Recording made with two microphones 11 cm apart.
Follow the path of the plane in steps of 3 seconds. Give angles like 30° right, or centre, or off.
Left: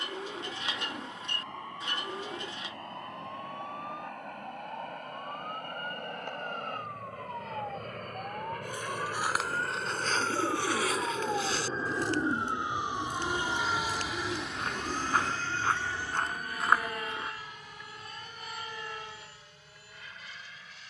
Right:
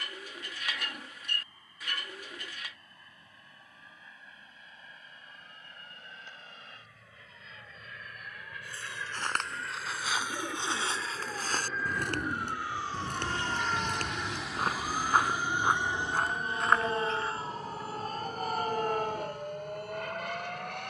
70° left, 60° left, 50° left, 40° left, 10° left, 20° right, 40° right.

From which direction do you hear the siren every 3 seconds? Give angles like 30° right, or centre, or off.
80° left, 80° left, 70° left, 40° left, centre, 40° right, 60° right.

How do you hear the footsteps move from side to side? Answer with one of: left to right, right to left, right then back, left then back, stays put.
right then back.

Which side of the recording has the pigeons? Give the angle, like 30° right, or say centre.
20° left.